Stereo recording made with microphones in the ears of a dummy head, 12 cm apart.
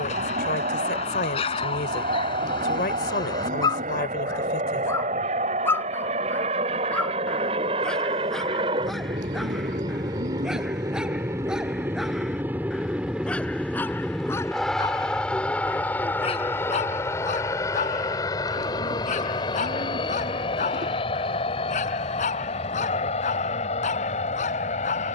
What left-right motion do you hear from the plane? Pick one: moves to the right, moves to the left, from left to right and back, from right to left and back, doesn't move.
moves to the left.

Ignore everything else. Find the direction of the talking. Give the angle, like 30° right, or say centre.
80° left.